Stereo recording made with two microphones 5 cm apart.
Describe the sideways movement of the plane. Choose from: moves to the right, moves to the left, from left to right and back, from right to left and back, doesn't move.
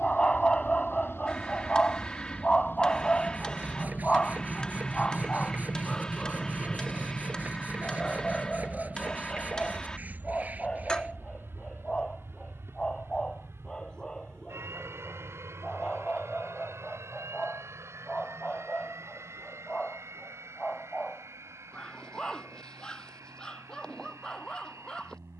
moves to the right.